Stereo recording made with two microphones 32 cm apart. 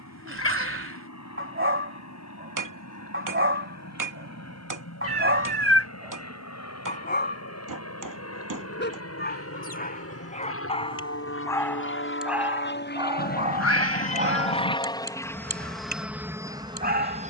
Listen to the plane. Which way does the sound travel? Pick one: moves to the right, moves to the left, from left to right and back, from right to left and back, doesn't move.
moves to the right.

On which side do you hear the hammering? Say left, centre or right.
right.